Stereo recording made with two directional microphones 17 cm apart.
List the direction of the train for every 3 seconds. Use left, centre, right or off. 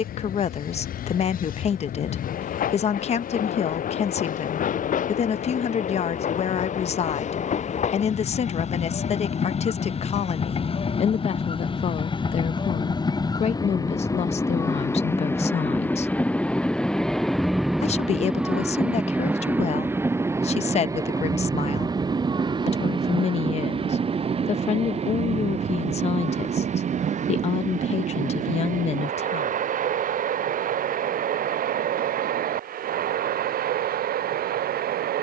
left, left, left, left, left, centre, centre, right, right, right, right, right.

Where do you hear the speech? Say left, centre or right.
left.